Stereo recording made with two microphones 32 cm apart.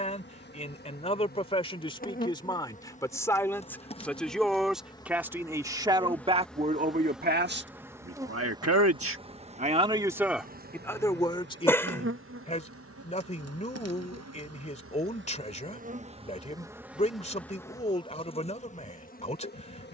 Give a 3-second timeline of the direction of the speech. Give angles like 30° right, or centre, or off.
20° left, centre, 30° right, centre, 20° left, 20° left, 20° left.